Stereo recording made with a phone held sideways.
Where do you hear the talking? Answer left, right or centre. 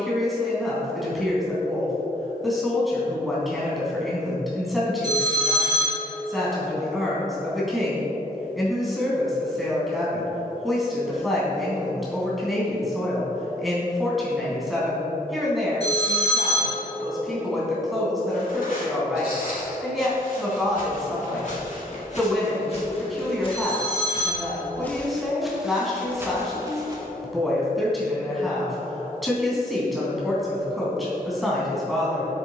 centre.